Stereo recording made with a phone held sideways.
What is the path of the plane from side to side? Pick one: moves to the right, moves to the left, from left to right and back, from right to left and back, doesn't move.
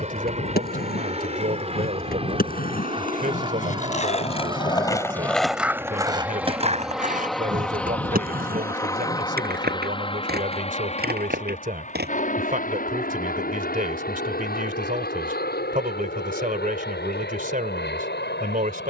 moves to the left.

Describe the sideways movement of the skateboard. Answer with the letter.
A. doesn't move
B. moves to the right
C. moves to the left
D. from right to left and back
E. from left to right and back
B.